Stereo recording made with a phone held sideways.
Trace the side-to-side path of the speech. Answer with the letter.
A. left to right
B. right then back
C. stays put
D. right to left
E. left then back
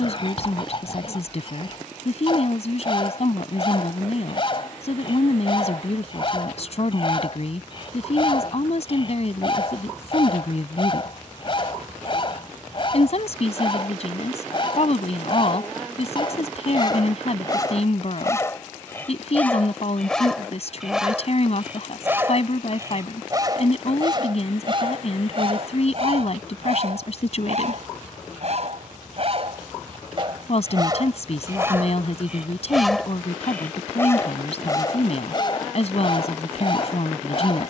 C.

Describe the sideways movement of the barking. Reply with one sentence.
In this clip you hear the barking move from left to right and back again.